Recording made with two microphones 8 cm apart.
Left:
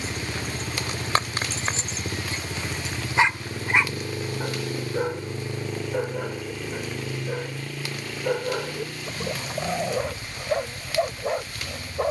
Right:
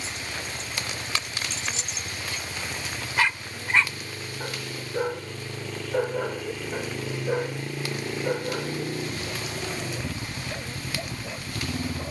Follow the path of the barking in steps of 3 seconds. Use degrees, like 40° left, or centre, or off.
40° left, 10° left, 10° right, 50° left.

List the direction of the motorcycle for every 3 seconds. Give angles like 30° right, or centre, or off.
50° left, 30° left, 10° right, 50° right.